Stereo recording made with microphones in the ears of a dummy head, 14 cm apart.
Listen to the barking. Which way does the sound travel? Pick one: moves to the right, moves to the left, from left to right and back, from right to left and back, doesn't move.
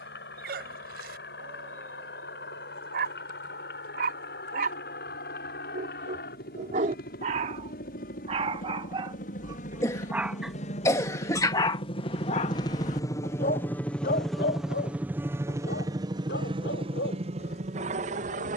moves to the left.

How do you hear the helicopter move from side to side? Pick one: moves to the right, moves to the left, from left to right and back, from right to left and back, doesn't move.
moves to the right.